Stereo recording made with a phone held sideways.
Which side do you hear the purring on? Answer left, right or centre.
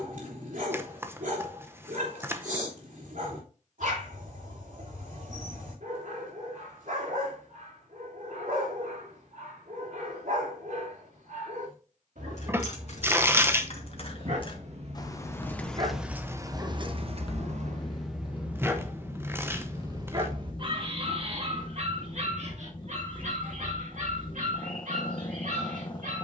left.